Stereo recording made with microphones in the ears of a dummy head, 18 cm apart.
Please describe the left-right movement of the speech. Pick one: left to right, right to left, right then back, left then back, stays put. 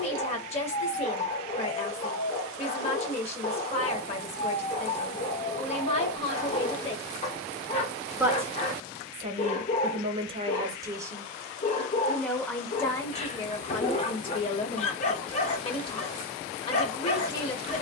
right then back.